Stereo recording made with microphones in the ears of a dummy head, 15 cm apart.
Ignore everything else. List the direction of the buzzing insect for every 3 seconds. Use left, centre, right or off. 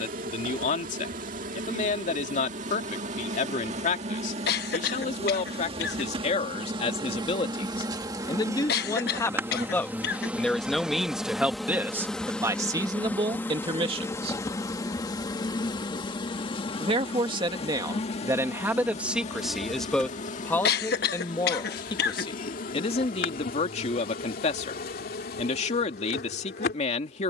right, right, right, centre, centre, left, left, left, left.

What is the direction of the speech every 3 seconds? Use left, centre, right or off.
left, left, left, centre, right, right, centre, left, left.